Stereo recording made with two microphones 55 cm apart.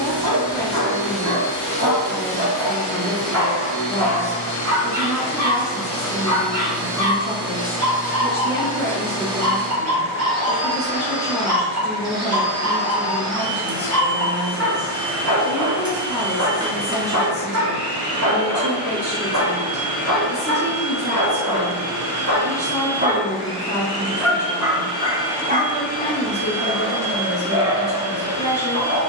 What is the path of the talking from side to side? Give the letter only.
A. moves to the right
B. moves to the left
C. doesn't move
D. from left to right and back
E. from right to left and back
C.